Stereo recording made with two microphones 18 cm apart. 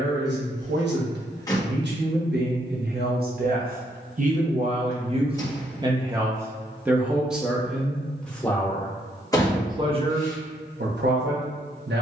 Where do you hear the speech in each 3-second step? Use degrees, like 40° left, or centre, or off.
60° right, 40° right, centre, 50° right.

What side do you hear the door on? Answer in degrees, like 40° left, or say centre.
20° left.